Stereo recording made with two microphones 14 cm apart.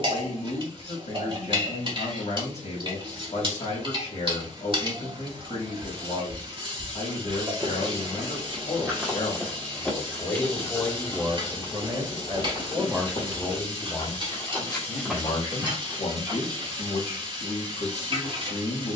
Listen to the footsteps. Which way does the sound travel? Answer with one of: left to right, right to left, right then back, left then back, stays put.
left then back.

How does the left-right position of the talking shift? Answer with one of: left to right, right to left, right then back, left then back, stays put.
right then back.